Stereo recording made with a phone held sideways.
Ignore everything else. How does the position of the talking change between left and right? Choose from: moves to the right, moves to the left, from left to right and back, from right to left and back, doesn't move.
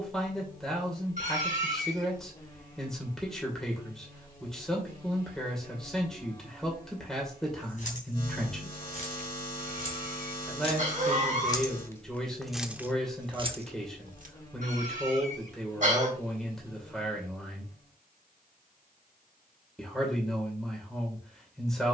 doesn't move.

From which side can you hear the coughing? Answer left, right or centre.
right.